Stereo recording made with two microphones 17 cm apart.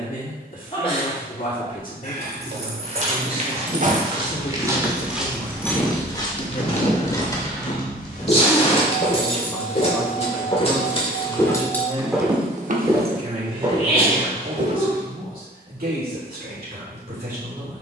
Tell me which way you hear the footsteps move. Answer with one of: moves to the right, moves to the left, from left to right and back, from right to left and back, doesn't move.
from right to left and back.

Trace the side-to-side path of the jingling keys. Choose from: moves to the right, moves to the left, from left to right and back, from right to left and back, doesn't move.
from right to left and back.